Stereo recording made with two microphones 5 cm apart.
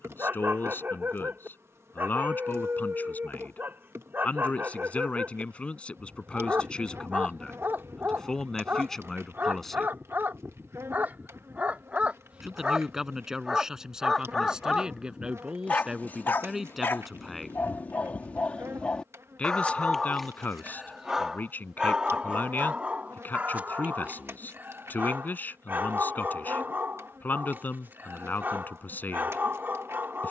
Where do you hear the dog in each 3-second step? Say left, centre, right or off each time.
right, right, right, right, centre, left, centre, right, right, right.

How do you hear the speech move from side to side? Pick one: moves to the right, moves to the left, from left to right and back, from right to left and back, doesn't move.
from left to right and back.